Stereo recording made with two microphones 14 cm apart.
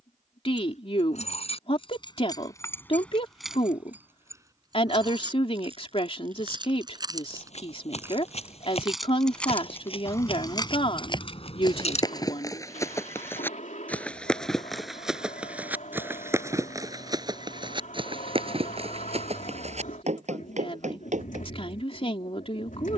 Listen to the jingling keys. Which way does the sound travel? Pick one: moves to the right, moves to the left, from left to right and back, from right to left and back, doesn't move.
from left to right and back.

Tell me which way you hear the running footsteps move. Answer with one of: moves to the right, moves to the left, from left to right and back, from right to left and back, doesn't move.
moves to the right.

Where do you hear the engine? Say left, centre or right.
left.